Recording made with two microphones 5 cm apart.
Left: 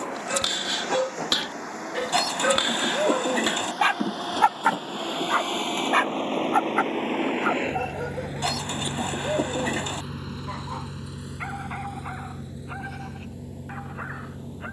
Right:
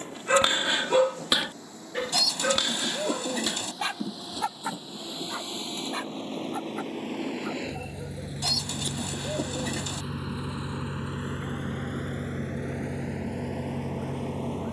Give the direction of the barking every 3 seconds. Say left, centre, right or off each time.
centre, left, left, left, left.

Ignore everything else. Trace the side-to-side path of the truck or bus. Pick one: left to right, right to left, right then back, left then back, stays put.
left to right.